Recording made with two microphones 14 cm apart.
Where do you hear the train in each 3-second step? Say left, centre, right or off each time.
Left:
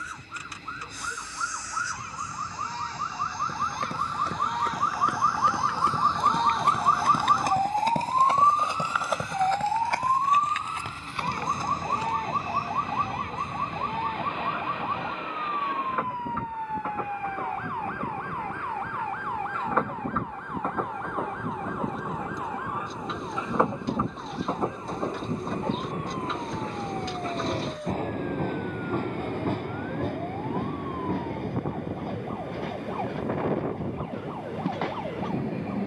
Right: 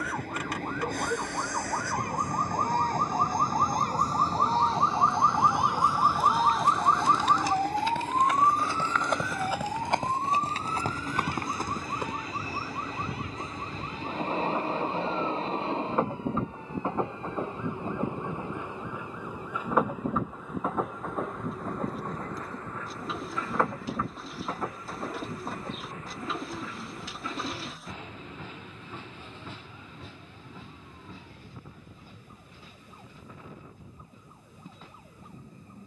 right, right, right, right, right, right, centre, centre, left, left, left, left.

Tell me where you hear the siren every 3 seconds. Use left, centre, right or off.
right, right, centre, left, left, left, left, left, left, left, left, left.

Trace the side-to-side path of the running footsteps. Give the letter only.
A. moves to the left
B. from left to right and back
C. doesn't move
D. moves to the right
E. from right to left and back
D.